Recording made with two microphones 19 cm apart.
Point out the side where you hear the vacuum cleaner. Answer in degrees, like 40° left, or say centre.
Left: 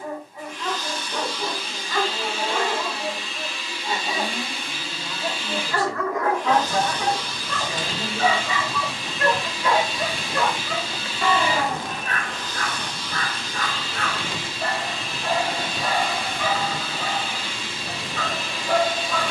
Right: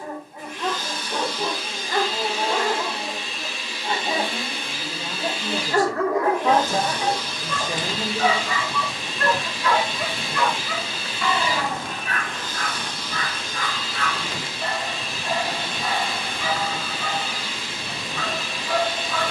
60° right.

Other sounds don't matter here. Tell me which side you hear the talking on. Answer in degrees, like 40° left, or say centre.
40° right.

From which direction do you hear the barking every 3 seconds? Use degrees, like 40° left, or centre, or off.
50° right, 50° right, 10° right, 40° left, 60° left, 70° left, 70° left.